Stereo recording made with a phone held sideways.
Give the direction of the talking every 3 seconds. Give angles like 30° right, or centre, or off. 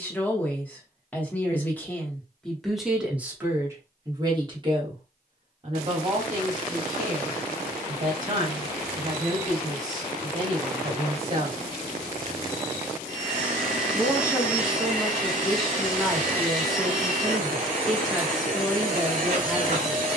10° left, 30° right, 50° right, 40° right, 10° right, centre, centre.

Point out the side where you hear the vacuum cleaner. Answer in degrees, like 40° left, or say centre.
60° right.